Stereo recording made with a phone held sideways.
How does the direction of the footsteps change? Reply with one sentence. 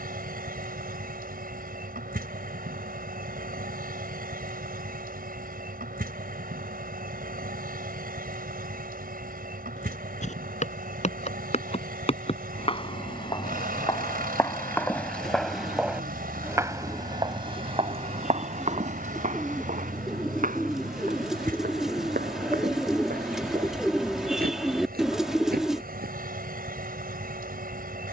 In this clip you hear the footsteps go from the left side to the right.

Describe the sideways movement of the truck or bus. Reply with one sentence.
You can hear the truck or bus stay put.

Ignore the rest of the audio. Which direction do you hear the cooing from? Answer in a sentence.
You can hear the cooing in the centre.